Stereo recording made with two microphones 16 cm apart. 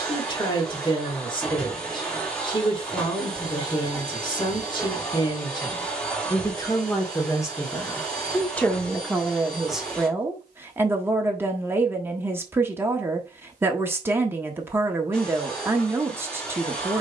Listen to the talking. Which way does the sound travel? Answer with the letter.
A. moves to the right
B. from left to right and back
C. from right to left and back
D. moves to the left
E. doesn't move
A.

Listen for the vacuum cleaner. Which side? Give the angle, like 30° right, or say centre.
10° left.